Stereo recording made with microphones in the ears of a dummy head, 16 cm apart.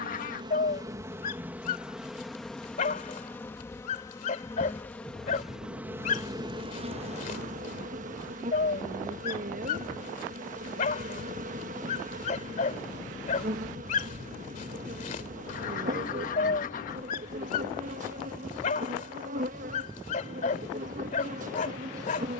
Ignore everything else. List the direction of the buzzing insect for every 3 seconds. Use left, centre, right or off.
centre, centre, right, right, right, right, right, right.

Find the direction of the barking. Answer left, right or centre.
left.